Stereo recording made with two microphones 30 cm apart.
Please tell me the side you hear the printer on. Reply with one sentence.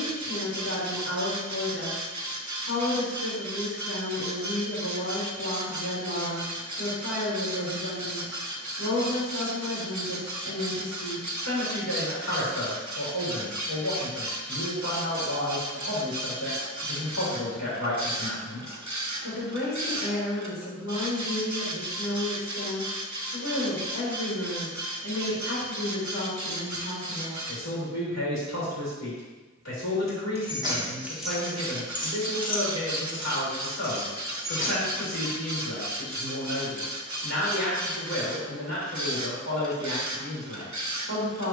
In this clip you hear the printer on the right.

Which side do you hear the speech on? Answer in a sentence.
You can hear the speech on the left.